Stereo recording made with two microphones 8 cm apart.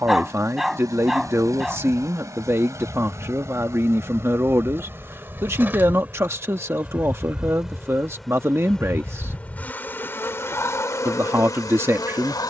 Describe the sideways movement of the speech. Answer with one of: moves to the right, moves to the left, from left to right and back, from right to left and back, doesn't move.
doesn't move.